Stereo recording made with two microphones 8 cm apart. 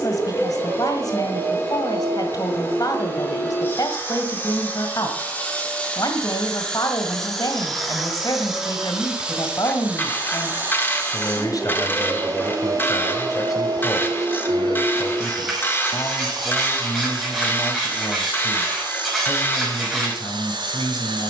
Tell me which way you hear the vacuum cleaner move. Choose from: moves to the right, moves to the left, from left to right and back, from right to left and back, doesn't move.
moves to the right.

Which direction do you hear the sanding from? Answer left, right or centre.
centre.